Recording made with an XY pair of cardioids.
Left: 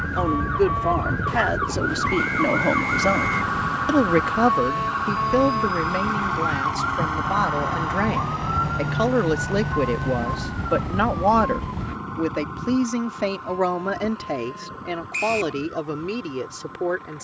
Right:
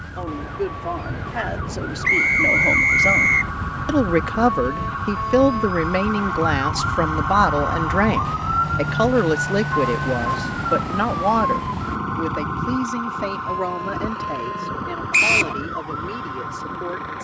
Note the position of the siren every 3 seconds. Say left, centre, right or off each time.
left, left, centre, right, right, right.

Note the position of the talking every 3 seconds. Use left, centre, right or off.
left, centre, right, centre, left, left.